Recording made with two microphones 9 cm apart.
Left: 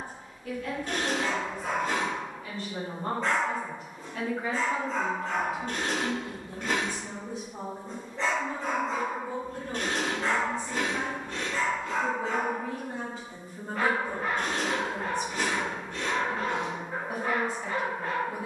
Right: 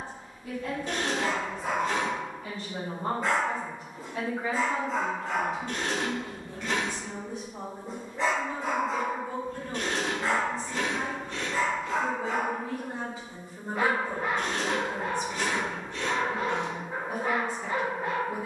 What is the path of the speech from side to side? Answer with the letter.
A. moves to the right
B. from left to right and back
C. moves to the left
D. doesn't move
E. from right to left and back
E.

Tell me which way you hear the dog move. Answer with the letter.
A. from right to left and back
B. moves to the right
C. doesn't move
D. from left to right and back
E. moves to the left
C.